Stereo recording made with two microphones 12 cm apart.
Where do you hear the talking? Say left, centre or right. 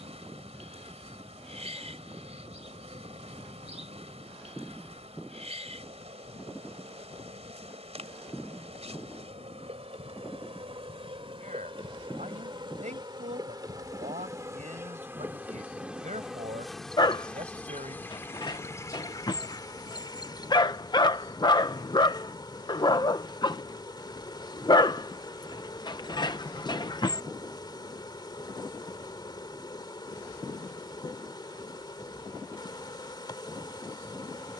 right.